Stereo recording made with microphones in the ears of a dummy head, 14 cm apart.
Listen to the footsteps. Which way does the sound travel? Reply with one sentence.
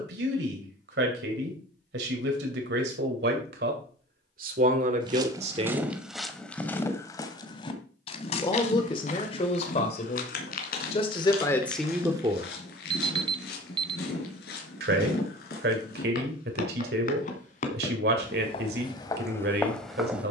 You can hear the footsteps go left and come back.